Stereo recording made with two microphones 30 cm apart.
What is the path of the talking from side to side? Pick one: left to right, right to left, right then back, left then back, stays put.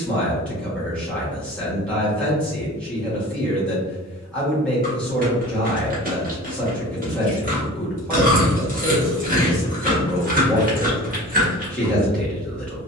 stays put.